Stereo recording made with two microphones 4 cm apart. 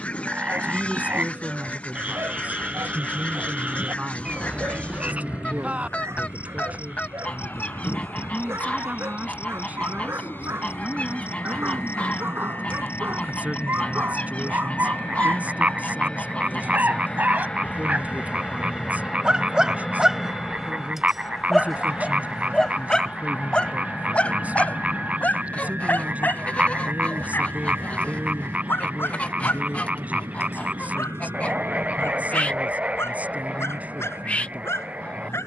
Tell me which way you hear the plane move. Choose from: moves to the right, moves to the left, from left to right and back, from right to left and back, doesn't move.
moves to the right.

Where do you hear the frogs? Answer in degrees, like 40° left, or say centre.
30° right.